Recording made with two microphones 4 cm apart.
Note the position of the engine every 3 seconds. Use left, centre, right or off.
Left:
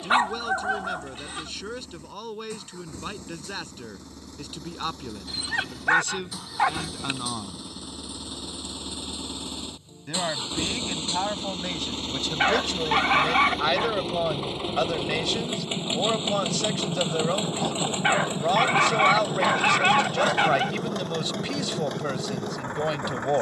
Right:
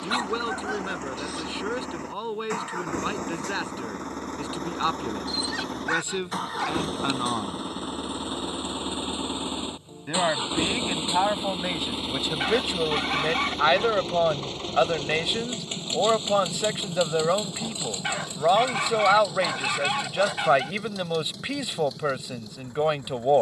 right, right, right, right, centre, left, left, left.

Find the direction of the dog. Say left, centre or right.
left.